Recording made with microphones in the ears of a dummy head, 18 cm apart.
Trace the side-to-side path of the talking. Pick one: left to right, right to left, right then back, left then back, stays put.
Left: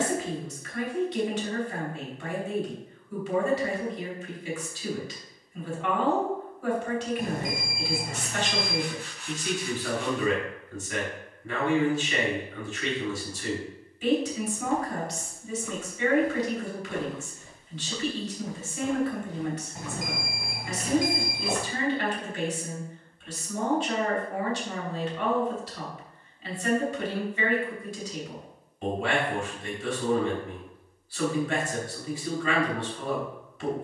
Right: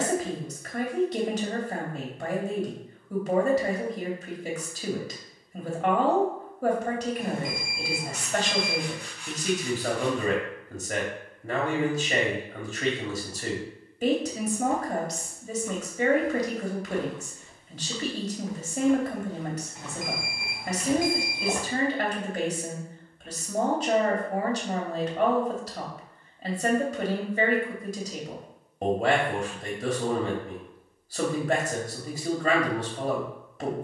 stays put.